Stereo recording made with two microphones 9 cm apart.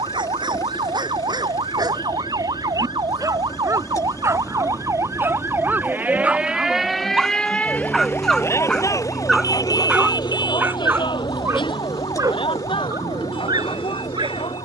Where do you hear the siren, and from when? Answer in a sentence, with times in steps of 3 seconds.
In this clip you hear the siren on the right from 0 s, in the centre from 6 s and on the left from 9 s.